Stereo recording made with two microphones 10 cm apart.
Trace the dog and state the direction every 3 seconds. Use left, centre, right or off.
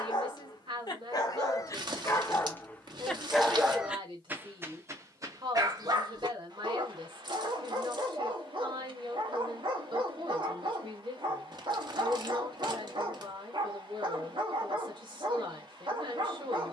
left, right, right, right, right, right.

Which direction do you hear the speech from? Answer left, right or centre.
right.